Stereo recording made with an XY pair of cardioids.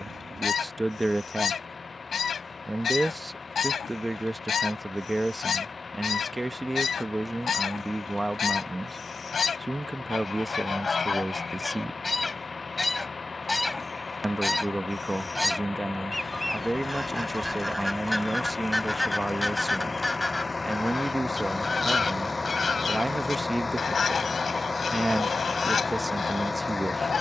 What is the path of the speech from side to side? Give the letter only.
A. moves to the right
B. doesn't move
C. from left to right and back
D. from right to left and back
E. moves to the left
B.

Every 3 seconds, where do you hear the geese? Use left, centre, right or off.
left, left, left, left, centre, centre, centre, left, left.